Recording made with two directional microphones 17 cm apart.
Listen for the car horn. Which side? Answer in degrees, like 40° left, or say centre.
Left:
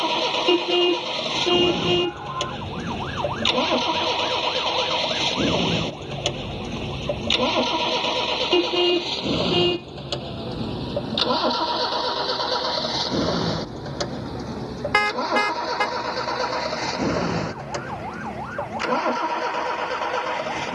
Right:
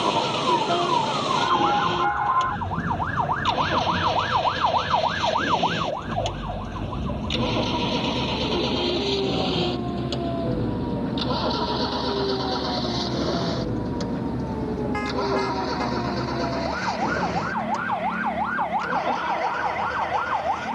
70° left.